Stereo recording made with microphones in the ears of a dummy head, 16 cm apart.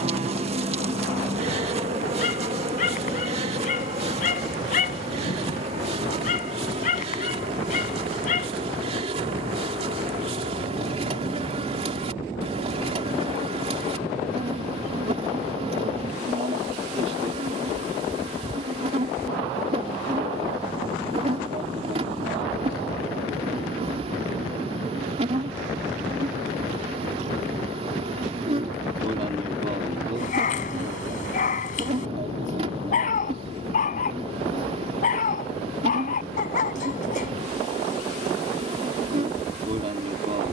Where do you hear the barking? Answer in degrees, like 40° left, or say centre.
50° left.